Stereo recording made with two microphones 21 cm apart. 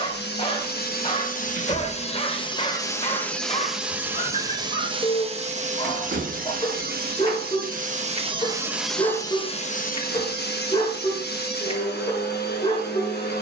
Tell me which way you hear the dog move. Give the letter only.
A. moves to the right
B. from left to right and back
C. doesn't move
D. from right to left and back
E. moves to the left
C.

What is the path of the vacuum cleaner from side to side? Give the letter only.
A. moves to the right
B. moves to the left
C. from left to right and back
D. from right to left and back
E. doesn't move
C.